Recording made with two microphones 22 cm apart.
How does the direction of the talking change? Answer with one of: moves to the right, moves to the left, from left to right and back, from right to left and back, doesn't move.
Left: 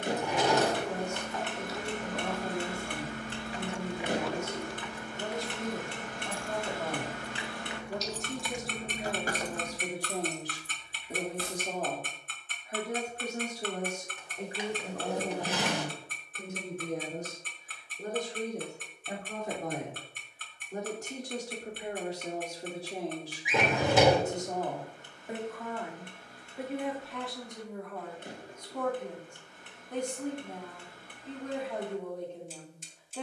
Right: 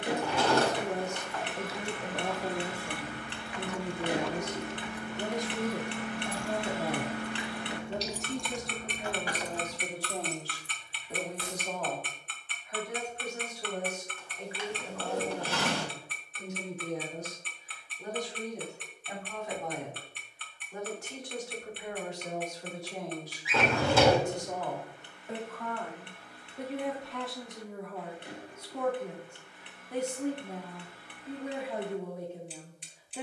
from right to left and back.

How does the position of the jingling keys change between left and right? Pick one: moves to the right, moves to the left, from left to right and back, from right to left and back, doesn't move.
from left to right and back.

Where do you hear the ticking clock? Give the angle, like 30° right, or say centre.
40° left.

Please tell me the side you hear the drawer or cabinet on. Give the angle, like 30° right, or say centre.
20° left.